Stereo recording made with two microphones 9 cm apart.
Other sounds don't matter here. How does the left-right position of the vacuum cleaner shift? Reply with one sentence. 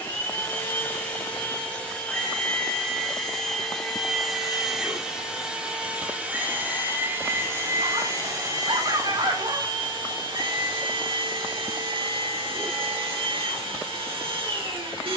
In this clip you hear the vacuum cleaner move from left to right.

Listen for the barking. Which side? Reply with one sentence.
You can hear the barking on the right.